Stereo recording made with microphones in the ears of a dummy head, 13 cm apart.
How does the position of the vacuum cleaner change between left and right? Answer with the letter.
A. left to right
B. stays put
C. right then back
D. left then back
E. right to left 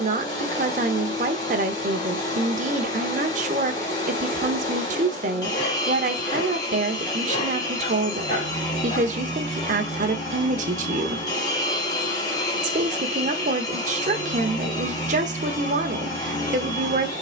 B.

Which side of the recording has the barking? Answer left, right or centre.
left.